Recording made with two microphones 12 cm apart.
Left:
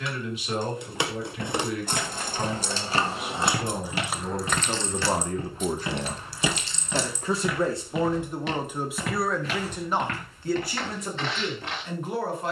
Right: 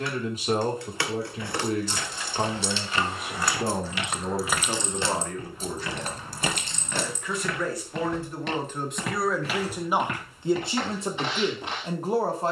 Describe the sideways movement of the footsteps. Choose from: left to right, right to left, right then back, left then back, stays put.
left to right.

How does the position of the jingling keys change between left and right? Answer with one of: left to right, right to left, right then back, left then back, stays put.
left to right.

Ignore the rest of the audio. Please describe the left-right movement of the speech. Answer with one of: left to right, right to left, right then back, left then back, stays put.
left then back.